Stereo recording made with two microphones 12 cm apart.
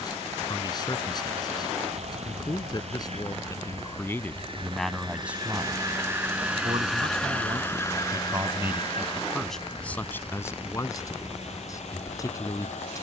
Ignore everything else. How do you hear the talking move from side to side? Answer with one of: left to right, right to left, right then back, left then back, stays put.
right then back.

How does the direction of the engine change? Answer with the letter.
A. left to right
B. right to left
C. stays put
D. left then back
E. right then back
B.